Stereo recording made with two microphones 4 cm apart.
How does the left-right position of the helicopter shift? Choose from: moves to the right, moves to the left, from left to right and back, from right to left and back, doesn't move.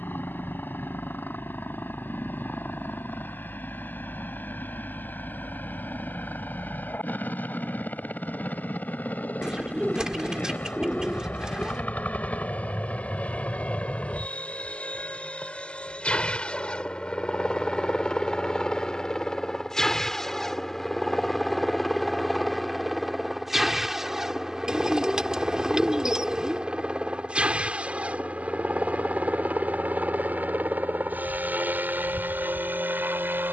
moves to the right.